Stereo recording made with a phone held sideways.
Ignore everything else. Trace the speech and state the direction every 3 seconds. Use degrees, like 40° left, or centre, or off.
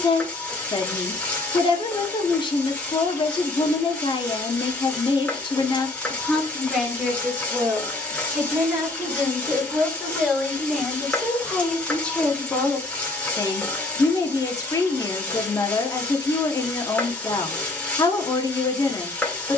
30° left, 30° left, centre, centre, 20° left, 20° left, 20° left.